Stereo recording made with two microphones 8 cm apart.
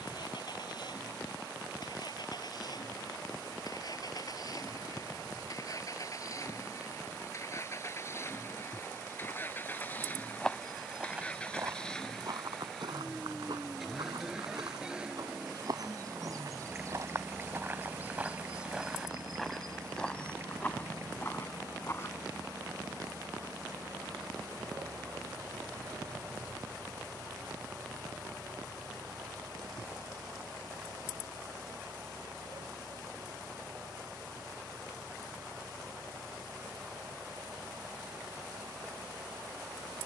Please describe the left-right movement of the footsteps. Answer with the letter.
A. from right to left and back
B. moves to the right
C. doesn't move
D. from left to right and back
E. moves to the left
D.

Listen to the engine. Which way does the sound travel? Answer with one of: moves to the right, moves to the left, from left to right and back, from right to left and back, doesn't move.
moves to the right.